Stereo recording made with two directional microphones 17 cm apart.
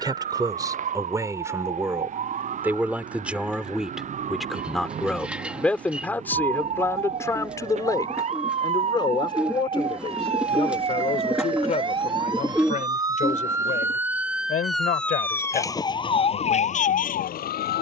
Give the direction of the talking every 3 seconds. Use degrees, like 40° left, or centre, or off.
20° right, centre, 20° left, 30° left, 50° left, 60° left.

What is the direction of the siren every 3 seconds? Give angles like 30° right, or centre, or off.
50° right, 50° right, 40° right, 40° right, 20° right, 40° left.